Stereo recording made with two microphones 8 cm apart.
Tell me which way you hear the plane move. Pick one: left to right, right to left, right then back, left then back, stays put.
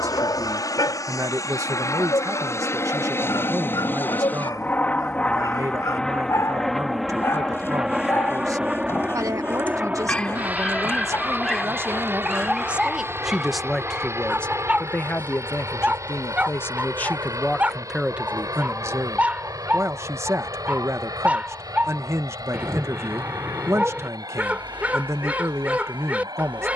left to right.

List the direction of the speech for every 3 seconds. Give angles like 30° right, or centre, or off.
40° right, 40° right, 40° right, 40° right, centre, 20° left, 30° right, 40° right, 40° right.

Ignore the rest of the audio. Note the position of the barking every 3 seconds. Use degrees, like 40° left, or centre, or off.
60° left, 50° left, 40° left, 10° left, 10° right, 20° right, 20° right, 20° right, 20° right.